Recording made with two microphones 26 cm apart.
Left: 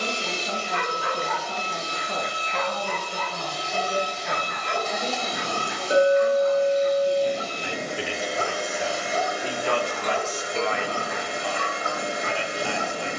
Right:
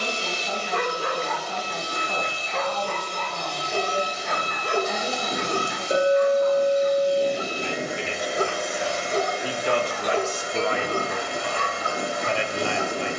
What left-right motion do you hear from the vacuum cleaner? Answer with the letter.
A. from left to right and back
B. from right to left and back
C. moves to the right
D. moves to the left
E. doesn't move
A.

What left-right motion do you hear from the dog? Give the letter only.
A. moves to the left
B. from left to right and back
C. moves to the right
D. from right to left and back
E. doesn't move
E.